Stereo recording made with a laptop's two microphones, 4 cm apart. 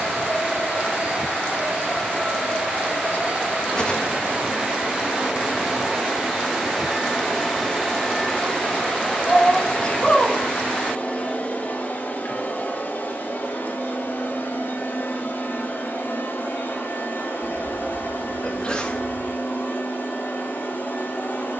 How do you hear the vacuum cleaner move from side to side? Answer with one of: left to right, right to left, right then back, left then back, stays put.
right to left.